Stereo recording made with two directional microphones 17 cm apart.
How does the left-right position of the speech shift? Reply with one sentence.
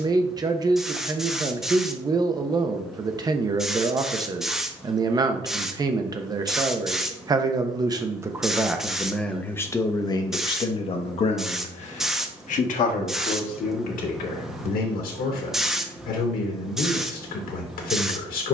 You can hear the speech move to the left.